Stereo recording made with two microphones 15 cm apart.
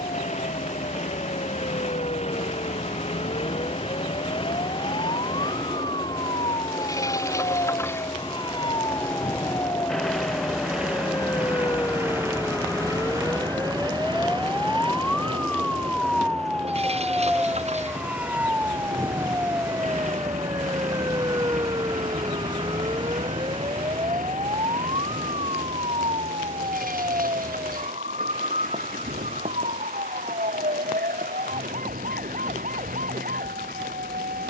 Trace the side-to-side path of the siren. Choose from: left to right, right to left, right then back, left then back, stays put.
left to right.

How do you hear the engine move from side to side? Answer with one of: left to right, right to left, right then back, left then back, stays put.
left to right.